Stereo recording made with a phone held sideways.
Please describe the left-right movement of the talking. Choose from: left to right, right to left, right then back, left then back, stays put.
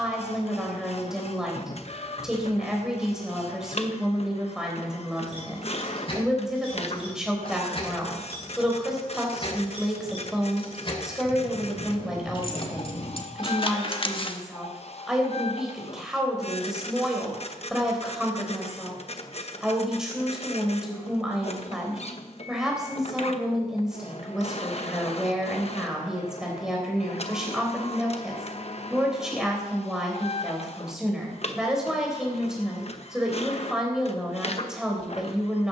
stays put.